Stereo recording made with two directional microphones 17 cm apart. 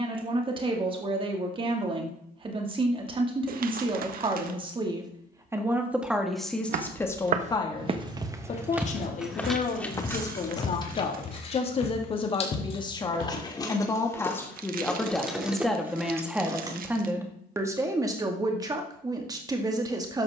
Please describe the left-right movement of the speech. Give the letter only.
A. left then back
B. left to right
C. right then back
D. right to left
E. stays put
A.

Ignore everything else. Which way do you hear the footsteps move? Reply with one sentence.
You can hear the footsteps move to the left.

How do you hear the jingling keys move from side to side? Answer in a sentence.
In this clip you hear the jingling keys move from right to left and back again.